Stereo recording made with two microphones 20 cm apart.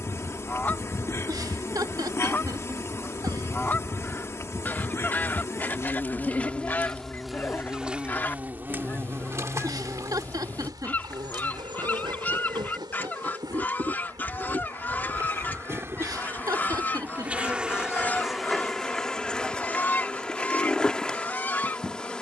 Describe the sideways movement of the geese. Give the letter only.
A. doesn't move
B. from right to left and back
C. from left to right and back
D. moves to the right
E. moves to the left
A.